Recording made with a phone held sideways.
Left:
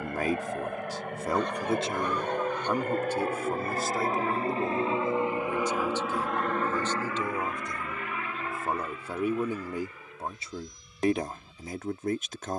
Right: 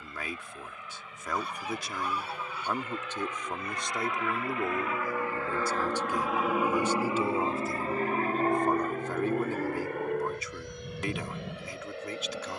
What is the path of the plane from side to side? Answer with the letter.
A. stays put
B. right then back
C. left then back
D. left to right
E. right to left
D.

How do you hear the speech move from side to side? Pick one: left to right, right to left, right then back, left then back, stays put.
right then back.